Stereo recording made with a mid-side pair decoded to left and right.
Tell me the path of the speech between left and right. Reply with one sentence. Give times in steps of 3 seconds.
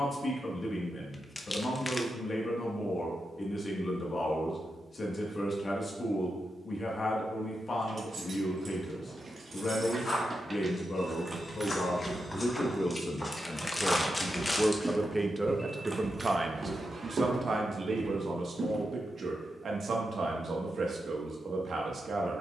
You can hear the speech on the left from 0 s and on the right from 15 s.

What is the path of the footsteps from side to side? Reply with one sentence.
You can hear the footsteps move to the right.